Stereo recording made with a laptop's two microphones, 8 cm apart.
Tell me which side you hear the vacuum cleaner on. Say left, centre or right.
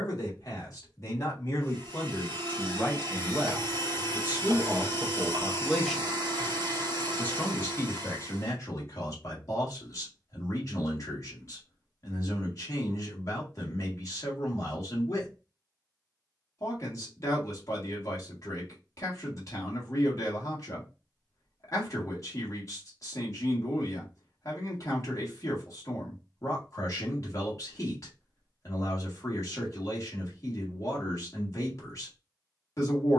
right.